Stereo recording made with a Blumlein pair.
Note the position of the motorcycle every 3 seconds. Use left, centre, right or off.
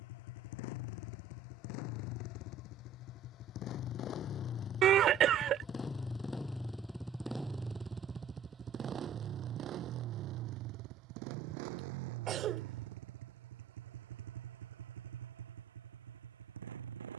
left, left, centre, right, right, right.